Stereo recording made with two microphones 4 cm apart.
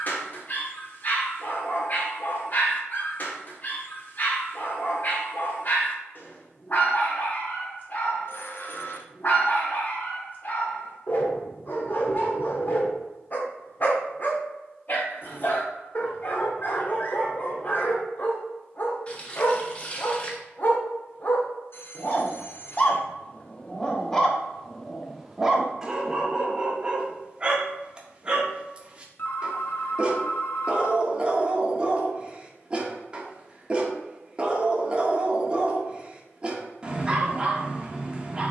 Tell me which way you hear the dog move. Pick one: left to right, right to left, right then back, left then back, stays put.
left to right.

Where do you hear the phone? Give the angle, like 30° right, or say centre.
50° left.